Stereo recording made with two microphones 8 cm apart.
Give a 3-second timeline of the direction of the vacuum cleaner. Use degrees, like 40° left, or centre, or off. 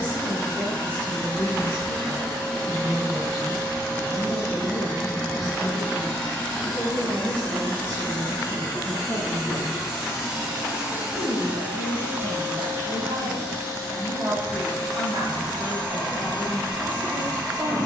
20° left, 20° left, 10° left, 10° right, 40° right, 60° right.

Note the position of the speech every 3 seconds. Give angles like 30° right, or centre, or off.
20° left, centre, 30° right, 50° right, 60° right, 60° right.